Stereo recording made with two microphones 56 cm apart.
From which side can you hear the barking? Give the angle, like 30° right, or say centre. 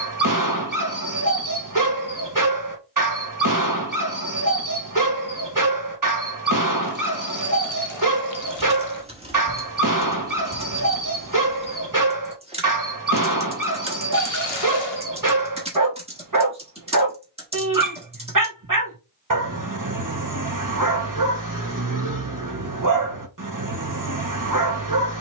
30° right.